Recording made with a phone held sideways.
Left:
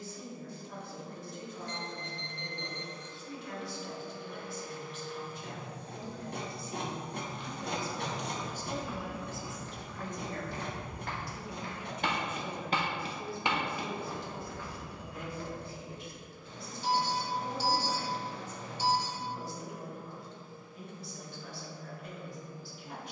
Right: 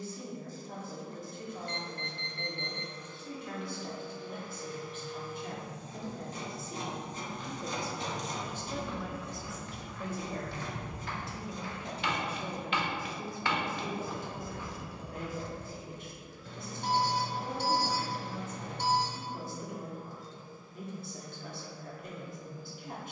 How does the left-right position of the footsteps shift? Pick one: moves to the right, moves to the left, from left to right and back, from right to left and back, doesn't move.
from right to left and back.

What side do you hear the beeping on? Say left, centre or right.
right.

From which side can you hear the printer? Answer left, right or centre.
left.